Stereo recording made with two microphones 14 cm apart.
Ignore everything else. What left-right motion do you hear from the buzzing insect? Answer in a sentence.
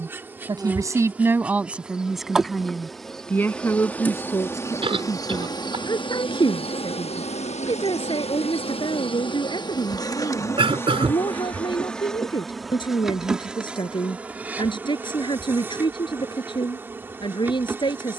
In this clip you hear the buzzing insect go left and come back.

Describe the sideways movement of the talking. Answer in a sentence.
You can hear the talking travel towards the left.